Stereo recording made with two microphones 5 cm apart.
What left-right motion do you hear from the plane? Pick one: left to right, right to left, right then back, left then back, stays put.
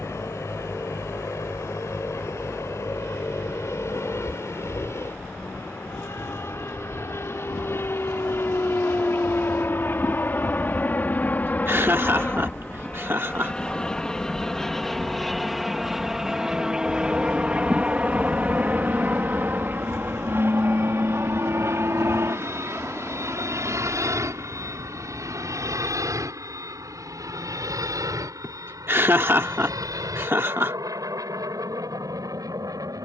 left to right.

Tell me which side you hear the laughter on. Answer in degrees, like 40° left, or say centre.
50° right.